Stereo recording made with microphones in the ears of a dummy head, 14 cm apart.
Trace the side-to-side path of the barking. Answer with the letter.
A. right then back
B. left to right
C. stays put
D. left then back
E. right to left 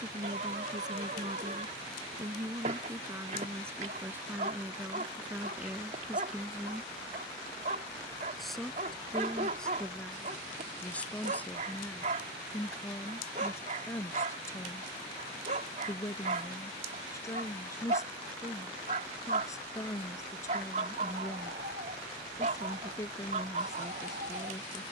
C.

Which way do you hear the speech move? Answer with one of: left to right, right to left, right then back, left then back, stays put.
right to left.